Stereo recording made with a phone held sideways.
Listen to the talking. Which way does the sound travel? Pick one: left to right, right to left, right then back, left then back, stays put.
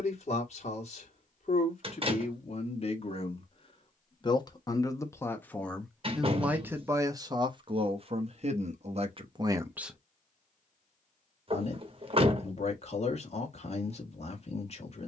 right then back.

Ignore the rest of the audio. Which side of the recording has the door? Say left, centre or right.
right.